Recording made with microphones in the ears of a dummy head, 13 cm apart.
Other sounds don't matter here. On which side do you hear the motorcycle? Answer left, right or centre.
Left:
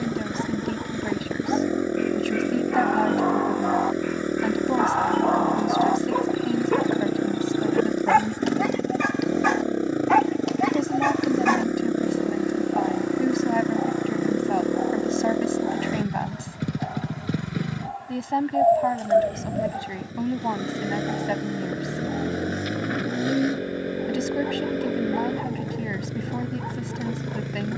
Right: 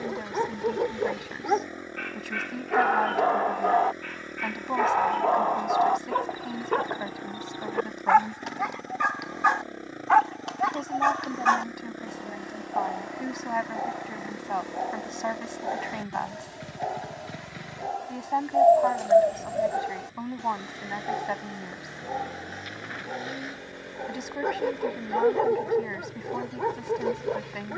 left.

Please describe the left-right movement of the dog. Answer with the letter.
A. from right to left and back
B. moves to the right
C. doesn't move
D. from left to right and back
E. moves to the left
A.